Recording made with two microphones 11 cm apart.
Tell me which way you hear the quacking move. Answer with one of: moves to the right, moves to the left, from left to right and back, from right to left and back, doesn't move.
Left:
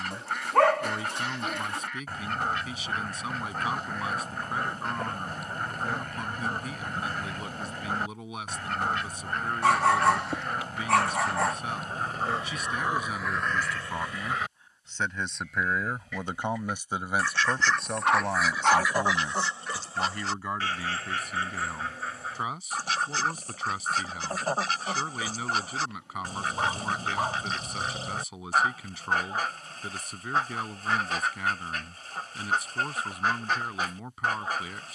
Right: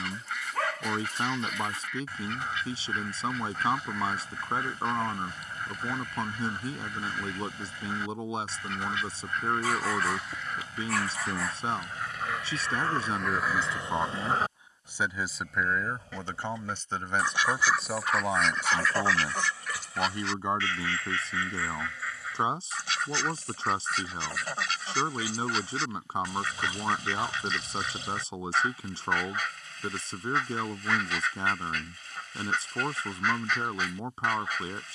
from left to right and back.